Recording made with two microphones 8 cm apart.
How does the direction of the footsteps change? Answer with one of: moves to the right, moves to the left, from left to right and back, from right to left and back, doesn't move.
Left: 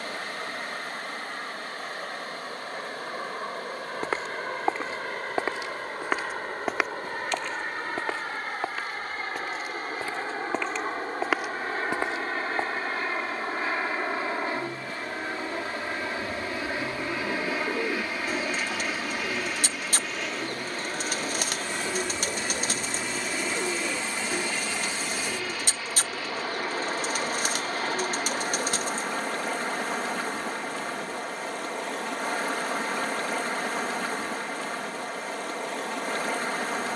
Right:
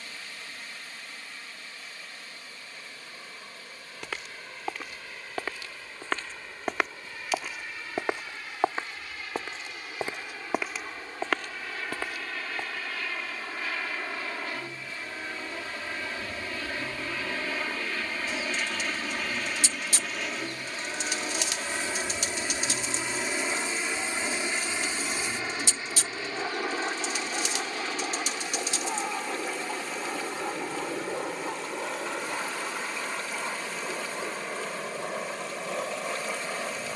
from left to right and back.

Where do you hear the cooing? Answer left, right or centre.
left.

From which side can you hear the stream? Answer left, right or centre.
left.